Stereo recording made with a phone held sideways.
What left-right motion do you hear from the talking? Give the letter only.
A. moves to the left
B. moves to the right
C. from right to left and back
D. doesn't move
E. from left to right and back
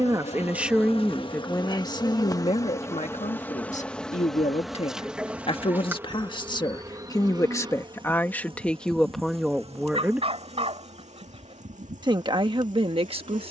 C.